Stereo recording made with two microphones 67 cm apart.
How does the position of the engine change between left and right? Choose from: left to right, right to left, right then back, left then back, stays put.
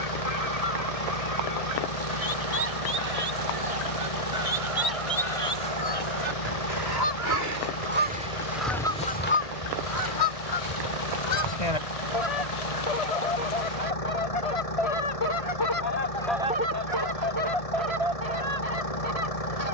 stays put.